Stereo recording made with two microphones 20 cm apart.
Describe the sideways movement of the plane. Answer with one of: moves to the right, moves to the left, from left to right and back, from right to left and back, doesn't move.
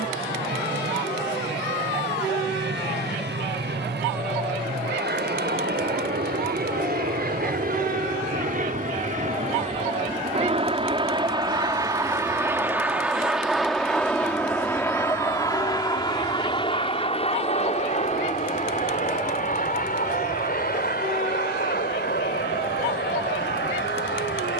moves to the left.